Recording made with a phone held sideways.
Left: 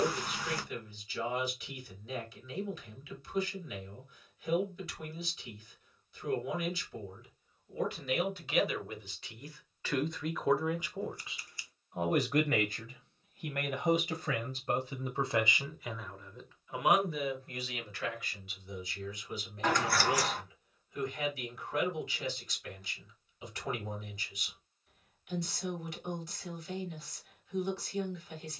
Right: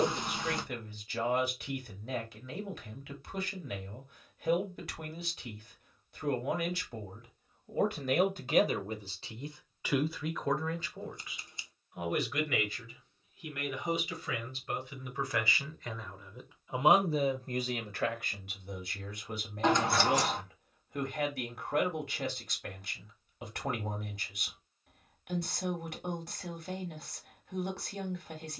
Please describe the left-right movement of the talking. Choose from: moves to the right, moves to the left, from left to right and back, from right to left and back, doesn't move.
from right to left and back.